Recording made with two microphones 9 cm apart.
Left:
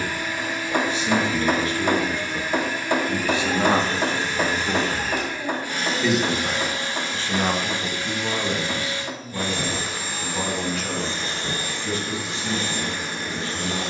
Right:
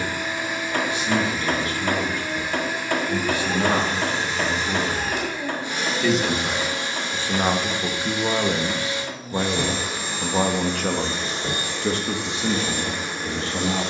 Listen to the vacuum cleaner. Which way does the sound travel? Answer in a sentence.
In this clip you hear the vacuum cleaner stay in one place.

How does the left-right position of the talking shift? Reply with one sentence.
In this clip you hear the talking move to the right.